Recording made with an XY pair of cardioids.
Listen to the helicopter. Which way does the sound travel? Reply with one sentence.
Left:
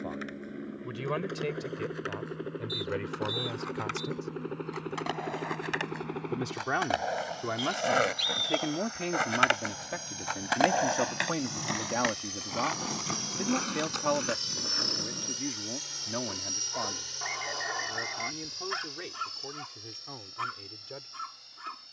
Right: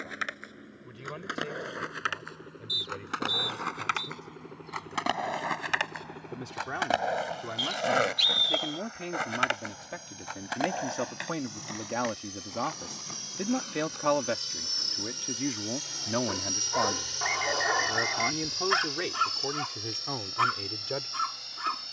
You can hear the helicopter move to the right.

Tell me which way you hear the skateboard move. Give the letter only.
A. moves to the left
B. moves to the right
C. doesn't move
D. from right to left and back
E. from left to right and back
A.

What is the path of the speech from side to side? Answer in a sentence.
You can hear the speech go from the left side to the right.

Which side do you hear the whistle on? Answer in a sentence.
You can hear the whistle on the right.